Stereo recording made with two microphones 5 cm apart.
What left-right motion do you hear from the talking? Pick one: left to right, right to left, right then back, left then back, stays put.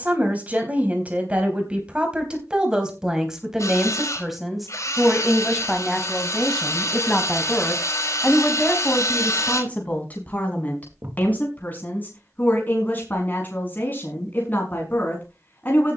right to left.